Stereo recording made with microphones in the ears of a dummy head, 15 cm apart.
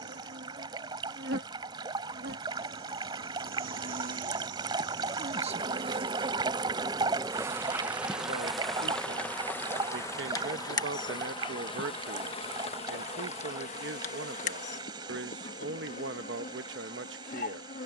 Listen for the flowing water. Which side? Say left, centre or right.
right.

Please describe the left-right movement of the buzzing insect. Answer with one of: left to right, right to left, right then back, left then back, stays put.
right to left.